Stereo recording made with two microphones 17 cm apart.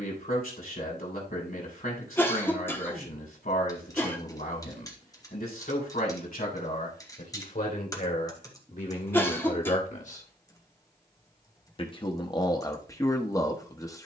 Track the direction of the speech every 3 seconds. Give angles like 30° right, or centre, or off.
60° left, 60° left, 50° left, 40° left, 20° left.